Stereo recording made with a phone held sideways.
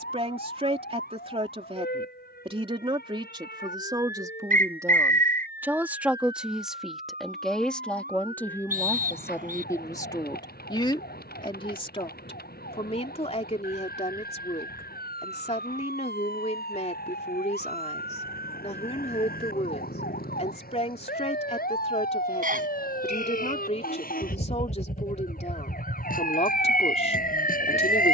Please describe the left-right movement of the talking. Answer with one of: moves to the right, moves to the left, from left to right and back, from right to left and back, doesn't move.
moves to the left.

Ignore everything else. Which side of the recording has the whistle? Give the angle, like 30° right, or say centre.
60° right.